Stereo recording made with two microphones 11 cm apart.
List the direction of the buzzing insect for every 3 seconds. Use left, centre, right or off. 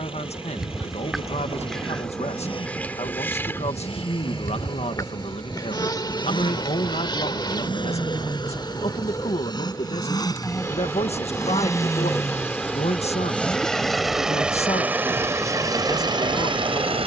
centre, left, left, left, centre, centre.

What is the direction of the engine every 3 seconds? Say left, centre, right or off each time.
left, left, left, left, centre, right.